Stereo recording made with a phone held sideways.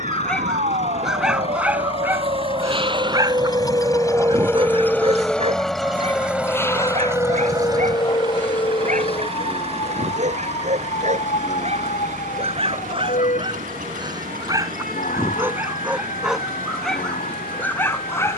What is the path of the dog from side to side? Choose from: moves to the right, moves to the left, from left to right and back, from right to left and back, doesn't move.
from left to right and back.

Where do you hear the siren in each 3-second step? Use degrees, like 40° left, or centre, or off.
50° right, 10° right, 30° left, 50° left, 60° left, 60° left.